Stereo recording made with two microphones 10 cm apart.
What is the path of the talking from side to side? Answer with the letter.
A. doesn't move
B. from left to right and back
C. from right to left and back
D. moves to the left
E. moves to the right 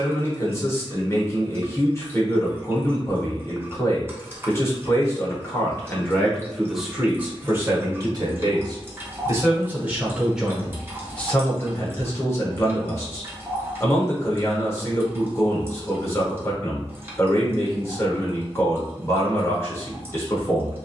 B.